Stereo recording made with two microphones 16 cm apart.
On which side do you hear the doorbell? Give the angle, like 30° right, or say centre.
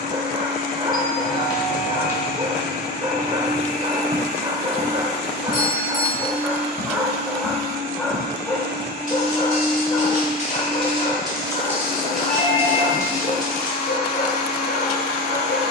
60° left.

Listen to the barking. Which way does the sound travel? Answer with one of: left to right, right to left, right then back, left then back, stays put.
right to left.